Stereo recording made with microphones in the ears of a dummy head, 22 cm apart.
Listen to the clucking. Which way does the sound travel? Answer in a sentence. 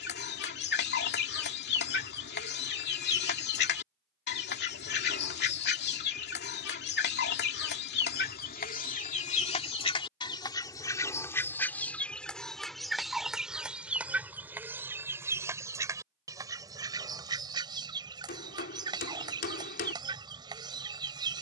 You can hear the clucking go from the left side to the right.